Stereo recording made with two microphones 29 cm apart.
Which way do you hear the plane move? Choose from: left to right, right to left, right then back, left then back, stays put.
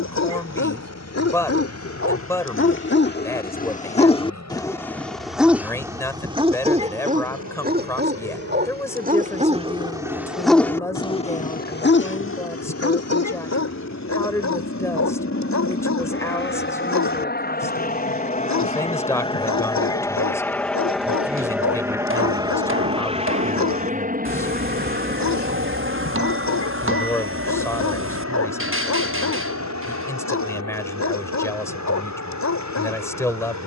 left to right.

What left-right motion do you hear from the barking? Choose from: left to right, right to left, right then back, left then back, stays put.
right then back.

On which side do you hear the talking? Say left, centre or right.
centre.